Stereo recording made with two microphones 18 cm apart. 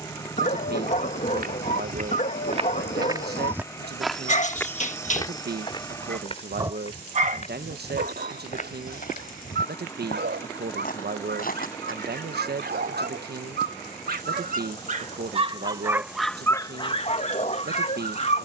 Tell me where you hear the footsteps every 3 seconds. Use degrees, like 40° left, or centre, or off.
50° right, 10° left, 40° left, 50° left, off, off.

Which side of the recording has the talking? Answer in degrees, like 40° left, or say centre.
60° right.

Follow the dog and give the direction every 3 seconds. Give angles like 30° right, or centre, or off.
40° left, 40° left, 50° right, 70° right, 60° right, 10° left.